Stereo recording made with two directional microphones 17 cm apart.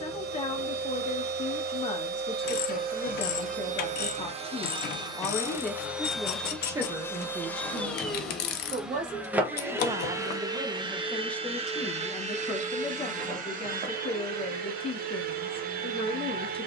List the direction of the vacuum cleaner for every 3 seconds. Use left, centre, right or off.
right, right, centre, right, right, right.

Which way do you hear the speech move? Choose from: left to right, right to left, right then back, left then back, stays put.
right then back.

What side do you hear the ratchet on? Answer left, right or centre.
left.